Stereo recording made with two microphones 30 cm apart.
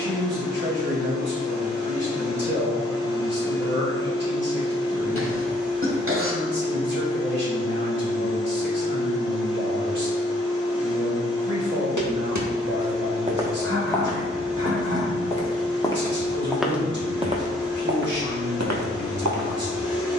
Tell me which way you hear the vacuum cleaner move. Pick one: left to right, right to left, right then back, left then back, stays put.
stays put.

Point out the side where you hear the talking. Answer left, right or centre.
right.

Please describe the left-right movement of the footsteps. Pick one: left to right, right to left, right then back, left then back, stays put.
left then back.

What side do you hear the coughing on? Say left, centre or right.
right.